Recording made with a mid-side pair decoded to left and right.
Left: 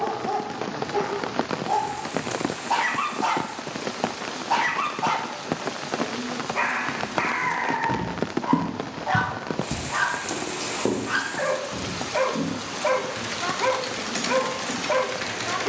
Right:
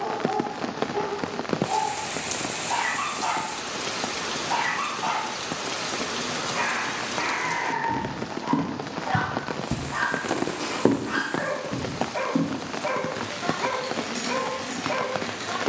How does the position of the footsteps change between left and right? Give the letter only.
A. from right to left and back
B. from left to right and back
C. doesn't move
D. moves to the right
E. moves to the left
D.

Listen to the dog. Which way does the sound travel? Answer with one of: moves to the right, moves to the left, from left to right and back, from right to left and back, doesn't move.
doesn't move.